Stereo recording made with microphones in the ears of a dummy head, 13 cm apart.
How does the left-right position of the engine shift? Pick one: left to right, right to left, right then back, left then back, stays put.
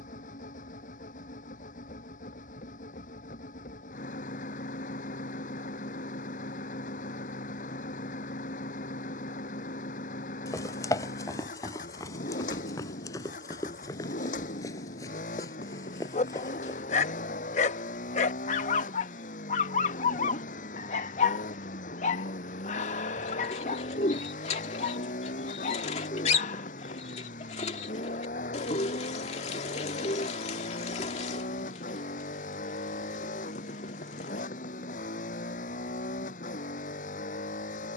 stays put.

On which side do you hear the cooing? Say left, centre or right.
left.